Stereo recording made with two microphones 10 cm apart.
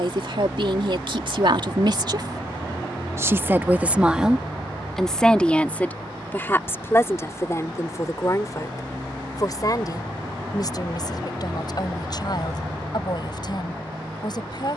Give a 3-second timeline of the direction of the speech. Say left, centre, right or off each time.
right, centre, left, left, left.